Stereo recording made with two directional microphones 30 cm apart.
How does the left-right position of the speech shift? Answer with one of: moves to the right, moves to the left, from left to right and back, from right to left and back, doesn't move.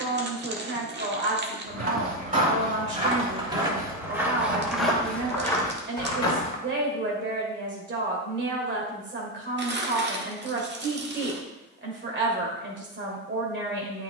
doesn't move.